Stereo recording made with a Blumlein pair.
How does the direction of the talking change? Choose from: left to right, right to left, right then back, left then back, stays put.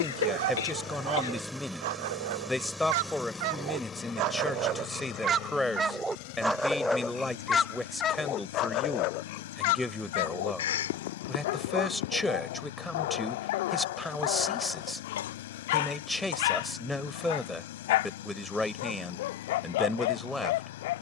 stays put.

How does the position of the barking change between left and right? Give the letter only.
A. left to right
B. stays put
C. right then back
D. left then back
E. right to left
E.